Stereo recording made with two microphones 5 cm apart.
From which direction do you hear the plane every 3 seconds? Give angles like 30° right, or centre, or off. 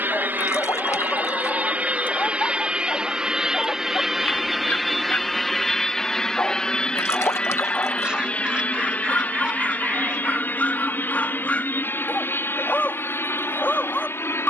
30° right, centre, 20° left, 30° left, 40° left.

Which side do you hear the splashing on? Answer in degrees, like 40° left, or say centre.
60° left.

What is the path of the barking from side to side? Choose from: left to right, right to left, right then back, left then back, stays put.
stays put.